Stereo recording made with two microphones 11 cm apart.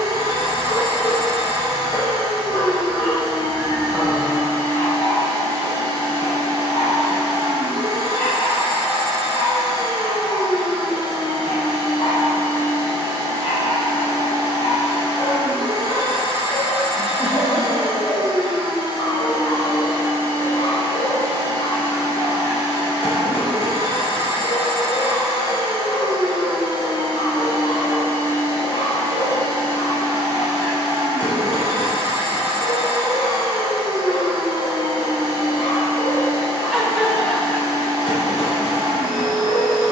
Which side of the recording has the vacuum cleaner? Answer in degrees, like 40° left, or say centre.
60° right.